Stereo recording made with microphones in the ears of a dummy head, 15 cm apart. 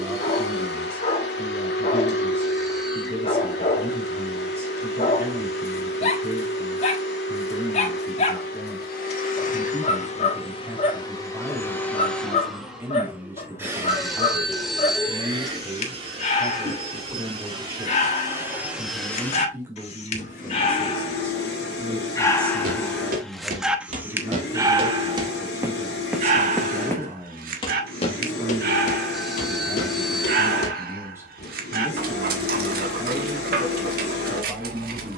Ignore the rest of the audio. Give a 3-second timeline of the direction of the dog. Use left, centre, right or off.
left, left, left, left, left, left, left, centre, right, right, right, right.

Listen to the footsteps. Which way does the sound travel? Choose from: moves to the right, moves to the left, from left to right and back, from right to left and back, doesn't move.
moves to the left.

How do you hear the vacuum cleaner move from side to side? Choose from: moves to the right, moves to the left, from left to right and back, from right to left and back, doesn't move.
from left to right and back.